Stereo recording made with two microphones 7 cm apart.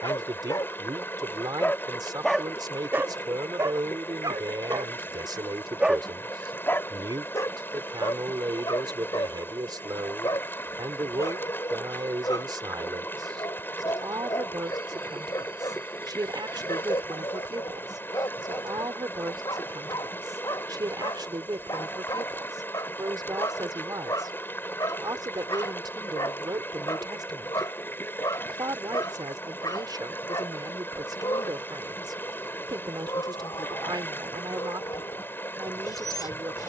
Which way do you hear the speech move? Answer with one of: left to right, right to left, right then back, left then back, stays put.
stays put.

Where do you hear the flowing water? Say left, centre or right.
left.